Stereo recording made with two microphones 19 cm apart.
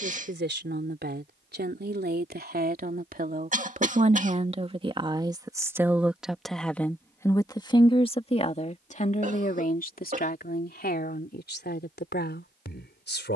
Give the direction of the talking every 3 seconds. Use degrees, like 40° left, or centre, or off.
60° right, 30° right, 20° left, 50° left, 60° left.